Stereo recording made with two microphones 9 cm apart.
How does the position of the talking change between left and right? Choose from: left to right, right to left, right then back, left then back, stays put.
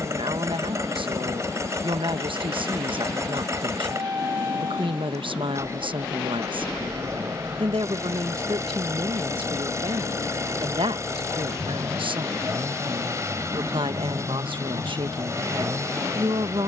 stays put.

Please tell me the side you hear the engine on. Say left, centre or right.
right.